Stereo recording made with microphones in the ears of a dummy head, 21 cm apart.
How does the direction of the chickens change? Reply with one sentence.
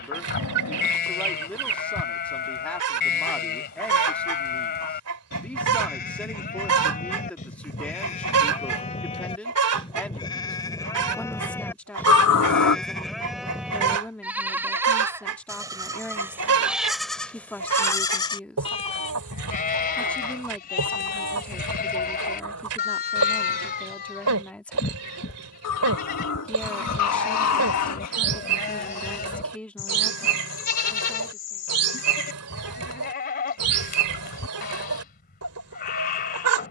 In this clip you hear the chickens stay put.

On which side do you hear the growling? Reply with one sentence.
You can hear the growling on the left.